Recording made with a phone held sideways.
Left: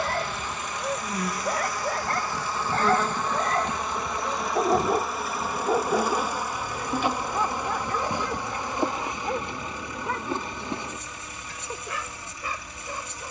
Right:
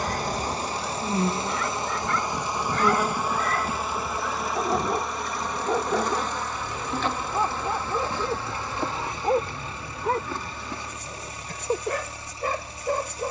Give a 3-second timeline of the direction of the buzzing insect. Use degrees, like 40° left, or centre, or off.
30° right, centre, 10° left, 20° left, 20° left.